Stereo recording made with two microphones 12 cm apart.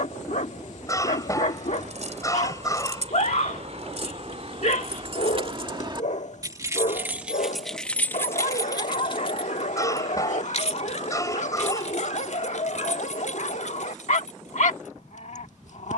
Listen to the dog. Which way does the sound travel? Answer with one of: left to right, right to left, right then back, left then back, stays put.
stays put.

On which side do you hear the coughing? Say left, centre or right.
left.